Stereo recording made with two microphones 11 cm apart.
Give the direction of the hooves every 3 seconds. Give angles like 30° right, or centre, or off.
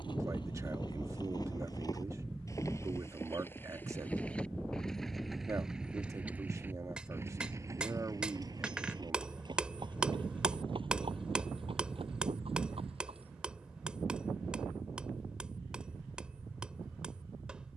40° left, 10° left, 30° right, 50° right, 60° right, off.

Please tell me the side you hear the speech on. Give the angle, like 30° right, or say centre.
30° right.